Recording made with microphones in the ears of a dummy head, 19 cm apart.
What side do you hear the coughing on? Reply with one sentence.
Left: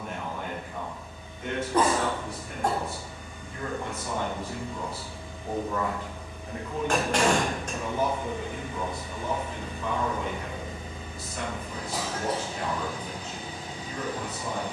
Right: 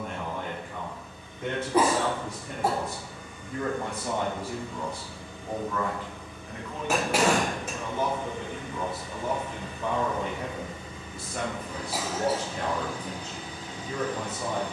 In this clip you hear the coughing in the centre.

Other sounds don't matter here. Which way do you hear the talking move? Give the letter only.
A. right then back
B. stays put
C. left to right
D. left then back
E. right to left
D.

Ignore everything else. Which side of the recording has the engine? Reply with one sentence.
In this clip you hear the engine on the left.